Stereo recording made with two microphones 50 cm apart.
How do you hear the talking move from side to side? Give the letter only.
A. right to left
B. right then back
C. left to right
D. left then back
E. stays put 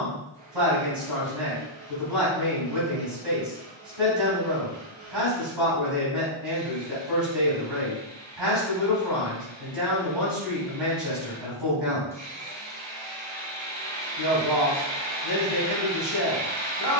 E.